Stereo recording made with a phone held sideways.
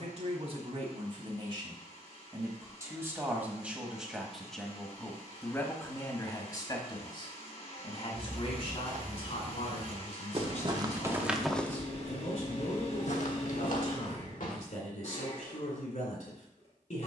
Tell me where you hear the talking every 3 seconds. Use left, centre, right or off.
right, centre, left, left, left, left.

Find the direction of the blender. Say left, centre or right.
left.